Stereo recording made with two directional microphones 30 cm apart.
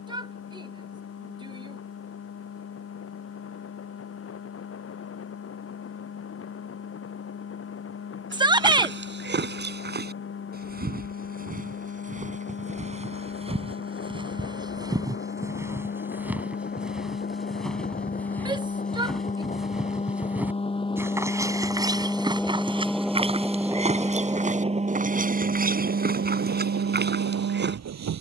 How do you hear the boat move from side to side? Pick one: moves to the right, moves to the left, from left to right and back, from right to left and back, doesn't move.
moves to the right.